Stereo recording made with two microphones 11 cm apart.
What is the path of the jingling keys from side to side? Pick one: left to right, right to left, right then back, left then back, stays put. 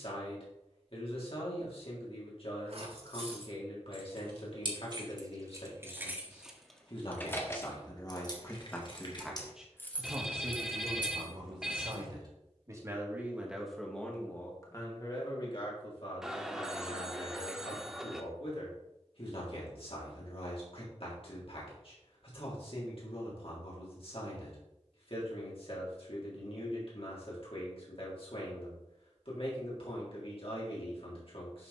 left then back.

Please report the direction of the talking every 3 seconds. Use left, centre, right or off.
left, left, left, right, centre, left, left, left, left, left, left.